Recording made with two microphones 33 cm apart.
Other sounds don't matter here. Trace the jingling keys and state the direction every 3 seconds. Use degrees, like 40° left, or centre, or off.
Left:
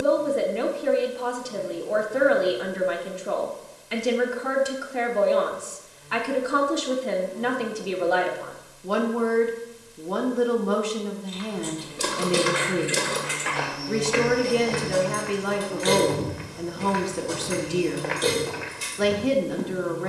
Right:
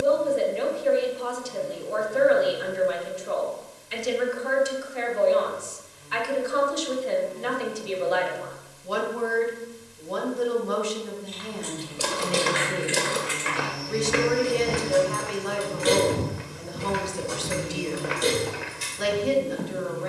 off, off, off, 20° left, 10° right, 20° right, 10° left.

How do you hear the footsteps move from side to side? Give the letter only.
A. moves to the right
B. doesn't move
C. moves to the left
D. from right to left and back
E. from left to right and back
E.